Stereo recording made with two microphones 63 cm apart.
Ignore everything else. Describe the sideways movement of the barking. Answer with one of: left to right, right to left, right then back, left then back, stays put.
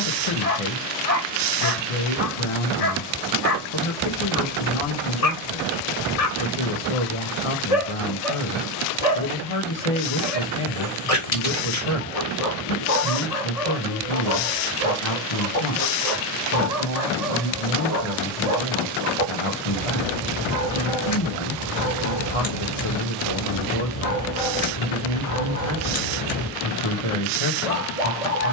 stays put.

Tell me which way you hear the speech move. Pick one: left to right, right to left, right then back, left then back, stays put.
stays put.